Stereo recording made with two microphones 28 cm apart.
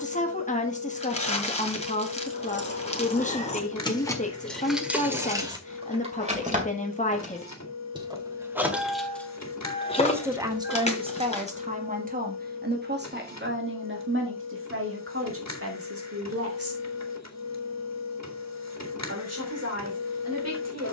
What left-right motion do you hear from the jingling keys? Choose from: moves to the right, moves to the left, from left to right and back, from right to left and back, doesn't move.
from left to right and back.